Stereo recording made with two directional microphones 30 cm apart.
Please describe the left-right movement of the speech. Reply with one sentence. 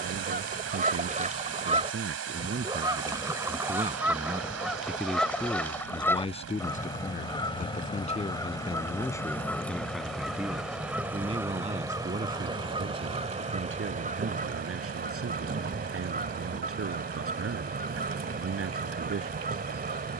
You can hear the speech move from right to left and back again.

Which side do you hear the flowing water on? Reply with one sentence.
In this clip you hear the flowing water on the right.